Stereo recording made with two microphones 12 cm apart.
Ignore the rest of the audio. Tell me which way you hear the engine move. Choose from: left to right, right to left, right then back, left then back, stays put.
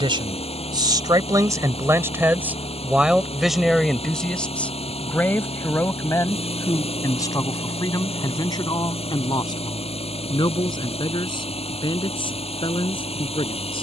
stays put.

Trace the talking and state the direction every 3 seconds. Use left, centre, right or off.
right, centre, left, left, left.